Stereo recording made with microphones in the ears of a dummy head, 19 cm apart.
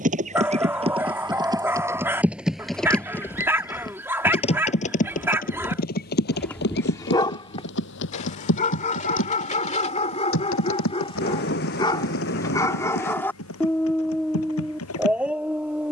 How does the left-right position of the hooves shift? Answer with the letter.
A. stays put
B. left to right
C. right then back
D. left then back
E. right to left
E.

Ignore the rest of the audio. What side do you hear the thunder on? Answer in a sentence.
In this clip you hear the thunder on the left.